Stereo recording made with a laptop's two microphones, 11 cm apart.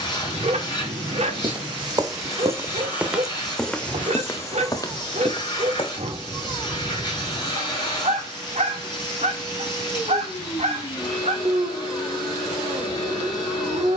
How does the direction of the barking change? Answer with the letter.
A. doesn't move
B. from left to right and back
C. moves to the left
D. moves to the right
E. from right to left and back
A.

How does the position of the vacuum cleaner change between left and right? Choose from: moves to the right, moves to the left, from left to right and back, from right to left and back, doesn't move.
doesn't move.